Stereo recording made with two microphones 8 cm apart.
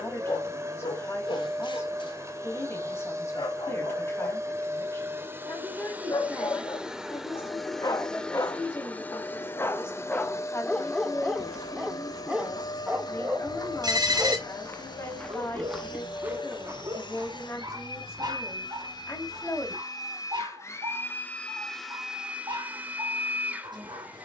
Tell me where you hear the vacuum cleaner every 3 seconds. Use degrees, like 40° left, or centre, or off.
40° right, 30° right, centre, 40° left, 60° left, 70° left, 50° left, 10° right.